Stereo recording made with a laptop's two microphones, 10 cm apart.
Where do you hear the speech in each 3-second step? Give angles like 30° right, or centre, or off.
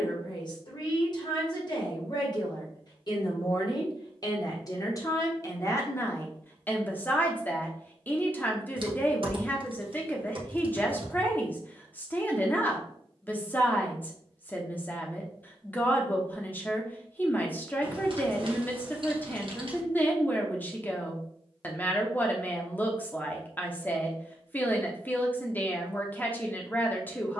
50° left, 40° left, 20° left, 20° left, 20° left, 20° left, 20° left, 20° left, 20° left.